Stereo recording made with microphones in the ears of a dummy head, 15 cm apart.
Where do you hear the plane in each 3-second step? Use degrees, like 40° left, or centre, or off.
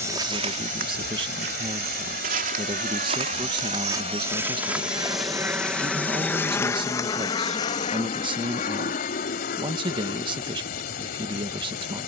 60° right, 30° right, 30° left, 50° left.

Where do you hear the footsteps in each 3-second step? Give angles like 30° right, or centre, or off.
50° right, 10° right, 20° left, off.